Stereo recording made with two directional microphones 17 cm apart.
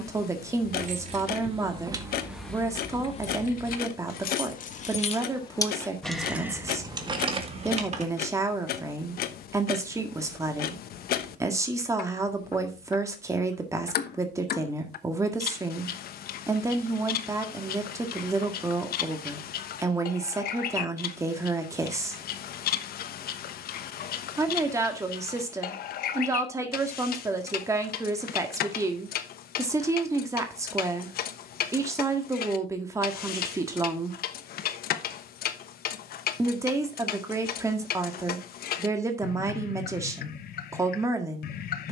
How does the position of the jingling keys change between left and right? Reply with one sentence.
In this clip you hear the jingling keys go left and come back.